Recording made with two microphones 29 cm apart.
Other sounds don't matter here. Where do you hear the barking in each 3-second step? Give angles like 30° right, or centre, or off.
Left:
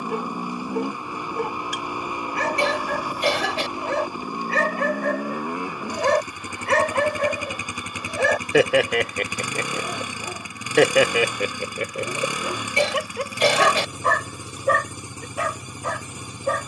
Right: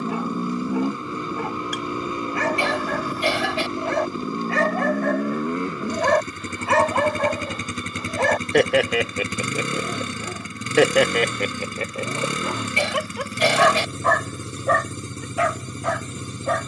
50° left, 40° left, 20° left, centre, 30° left, 40° left.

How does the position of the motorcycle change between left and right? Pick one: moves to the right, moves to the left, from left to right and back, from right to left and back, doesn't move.
doesn't move.